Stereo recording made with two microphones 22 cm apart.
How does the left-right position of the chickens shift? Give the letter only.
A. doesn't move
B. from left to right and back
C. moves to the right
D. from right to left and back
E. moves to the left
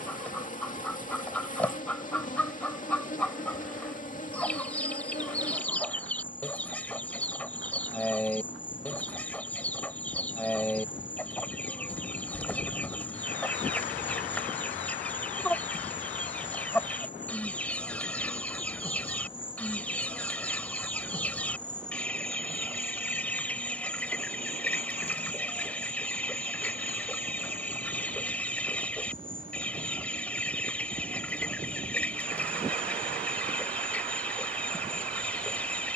A.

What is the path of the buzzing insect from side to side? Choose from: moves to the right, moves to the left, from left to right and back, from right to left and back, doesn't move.
moves to the right.